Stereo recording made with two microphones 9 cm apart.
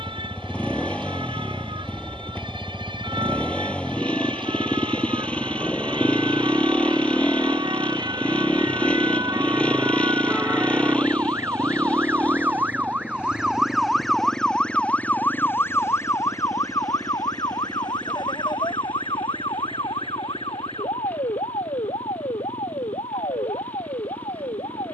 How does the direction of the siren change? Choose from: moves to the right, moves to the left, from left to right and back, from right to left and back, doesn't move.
moves to the left.